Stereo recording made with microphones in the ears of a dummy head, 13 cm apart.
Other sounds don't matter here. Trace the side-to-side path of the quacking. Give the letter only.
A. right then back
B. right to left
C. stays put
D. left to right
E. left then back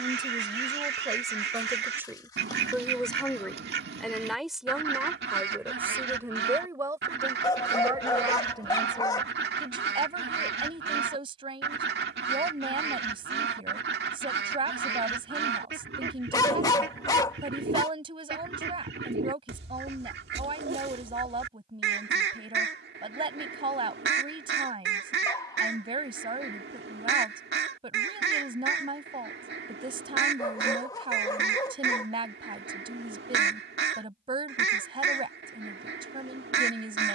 C.